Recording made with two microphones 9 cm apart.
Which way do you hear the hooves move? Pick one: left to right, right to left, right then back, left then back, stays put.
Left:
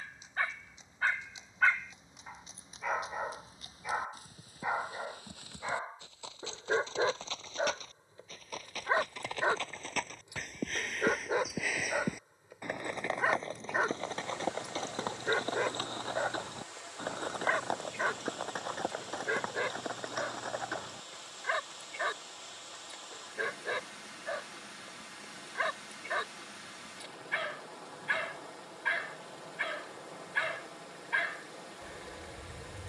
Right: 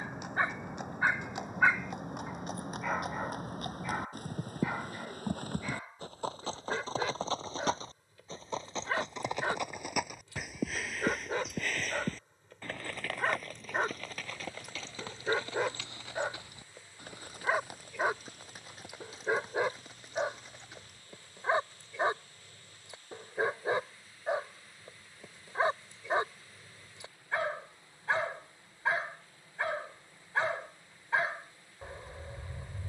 right to left.